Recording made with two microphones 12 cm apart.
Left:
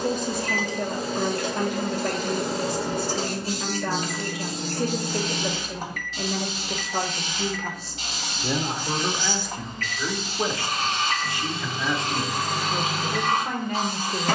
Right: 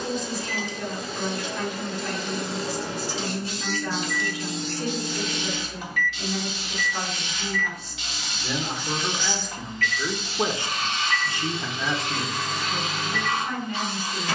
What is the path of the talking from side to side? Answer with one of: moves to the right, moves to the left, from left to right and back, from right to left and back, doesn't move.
from left to right and back.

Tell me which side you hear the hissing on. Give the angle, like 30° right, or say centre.
40° left.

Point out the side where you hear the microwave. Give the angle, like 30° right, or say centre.
40° left.